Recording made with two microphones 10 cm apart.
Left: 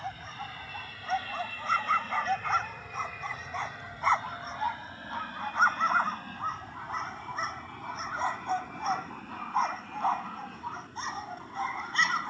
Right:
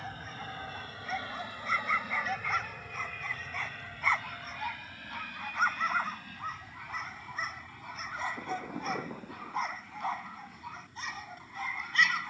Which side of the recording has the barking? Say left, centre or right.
left.